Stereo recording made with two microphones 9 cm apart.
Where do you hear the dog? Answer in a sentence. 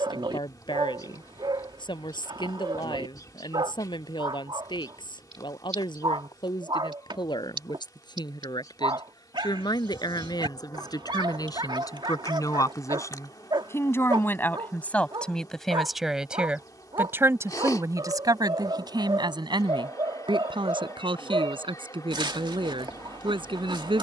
You can hear the dog on the right.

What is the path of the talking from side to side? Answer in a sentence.
You can hear the talking move to the right.